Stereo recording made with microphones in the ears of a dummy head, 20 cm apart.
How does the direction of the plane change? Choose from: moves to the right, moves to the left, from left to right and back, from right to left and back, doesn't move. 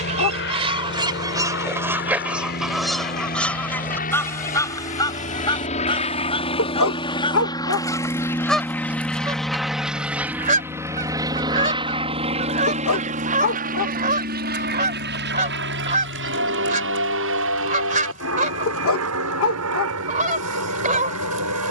moves to the right.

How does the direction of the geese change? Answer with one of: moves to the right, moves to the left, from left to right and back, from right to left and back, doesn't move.
from right to left and back.